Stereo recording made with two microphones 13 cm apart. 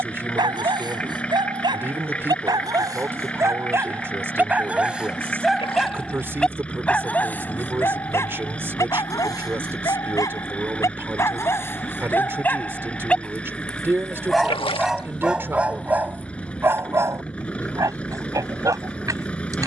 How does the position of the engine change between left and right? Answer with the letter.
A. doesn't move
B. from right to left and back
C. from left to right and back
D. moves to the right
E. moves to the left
A.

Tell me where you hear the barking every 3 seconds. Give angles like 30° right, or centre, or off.
30° right, 10° right, 20° left, 20° left, 10° left, 20° right, 30° right.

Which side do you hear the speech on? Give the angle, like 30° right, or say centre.
20° right.